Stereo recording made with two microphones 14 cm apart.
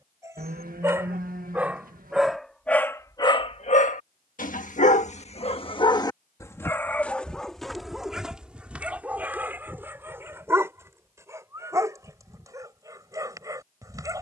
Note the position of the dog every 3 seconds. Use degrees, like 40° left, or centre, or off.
10° right, 50° left, centre, 20° right, 20° right.